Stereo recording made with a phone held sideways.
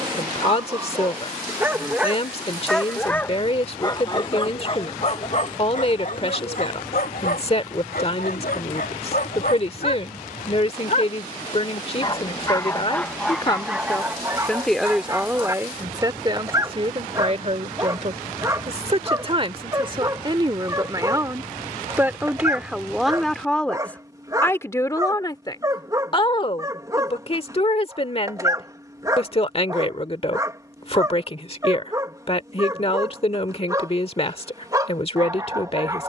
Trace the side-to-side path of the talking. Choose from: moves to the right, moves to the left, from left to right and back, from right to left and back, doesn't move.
from left to right and back.